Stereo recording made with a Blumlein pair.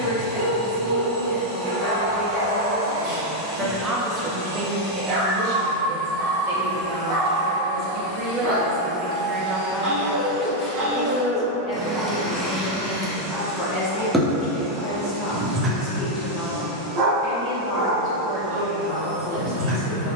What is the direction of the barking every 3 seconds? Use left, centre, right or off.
right, right, right, right, centre, right, right.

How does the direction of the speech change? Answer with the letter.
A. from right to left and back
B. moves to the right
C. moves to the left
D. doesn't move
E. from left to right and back
E.